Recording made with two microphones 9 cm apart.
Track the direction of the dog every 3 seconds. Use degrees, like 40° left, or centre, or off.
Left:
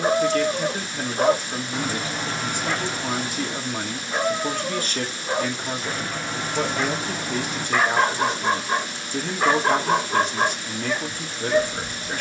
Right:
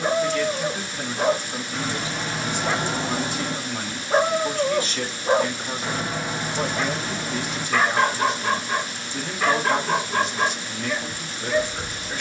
10° left, 40° right, 10° left, 30° left.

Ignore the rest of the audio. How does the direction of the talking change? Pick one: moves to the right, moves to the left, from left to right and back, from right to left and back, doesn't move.
doesn't move.